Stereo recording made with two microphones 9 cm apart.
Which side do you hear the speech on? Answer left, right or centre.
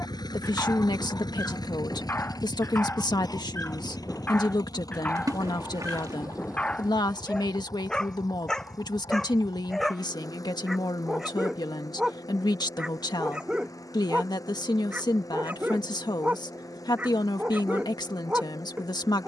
left.